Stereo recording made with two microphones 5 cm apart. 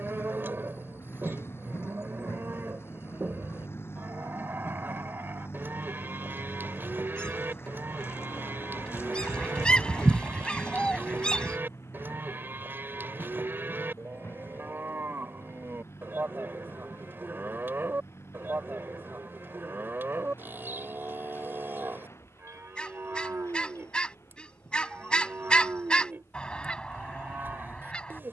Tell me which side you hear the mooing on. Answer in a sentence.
In this clip you hear the mooing on the right.